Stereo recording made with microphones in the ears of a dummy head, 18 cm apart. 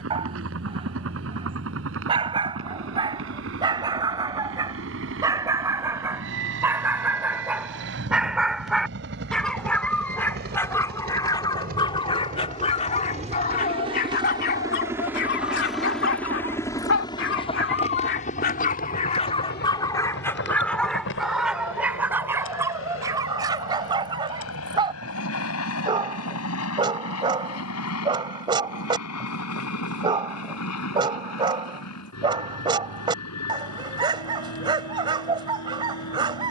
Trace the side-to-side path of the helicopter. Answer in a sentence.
In this clip you hear the helicopter travel towards the left.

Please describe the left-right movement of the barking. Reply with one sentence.
You can hear the barking move from right to left and back again.